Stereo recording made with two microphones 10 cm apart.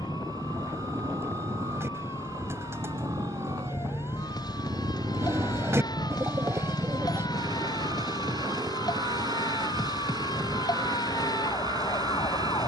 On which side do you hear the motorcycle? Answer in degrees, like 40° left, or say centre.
40° right.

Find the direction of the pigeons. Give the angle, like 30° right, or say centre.
20° right.